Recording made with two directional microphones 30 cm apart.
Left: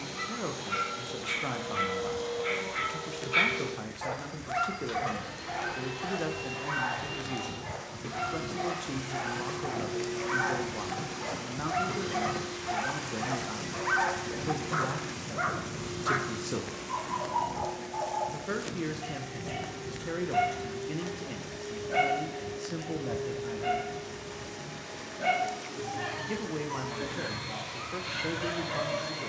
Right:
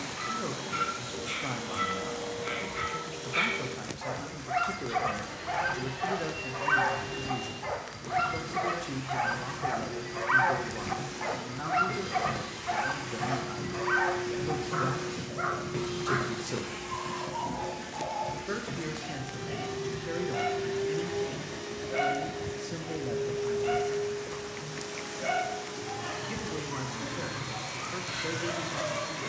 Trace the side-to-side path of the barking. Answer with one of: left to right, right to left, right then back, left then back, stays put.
right then back.